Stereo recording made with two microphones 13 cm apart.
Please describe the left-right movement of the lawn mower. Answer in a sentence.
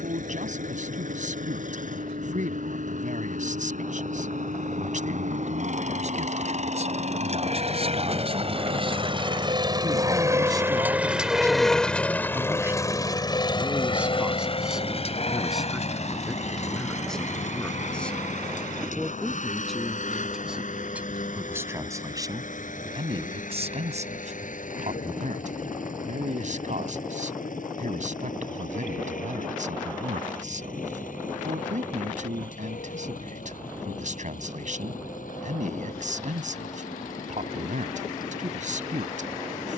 You can hear the lawn mower move to the left.